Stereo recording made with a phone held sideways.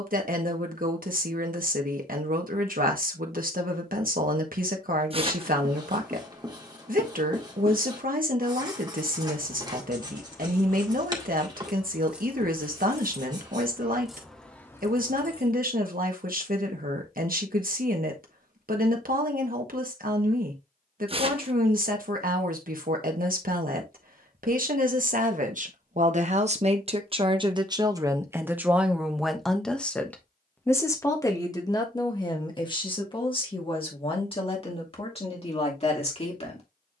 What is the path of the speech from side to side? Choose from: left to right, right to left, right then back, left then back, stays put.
right to left.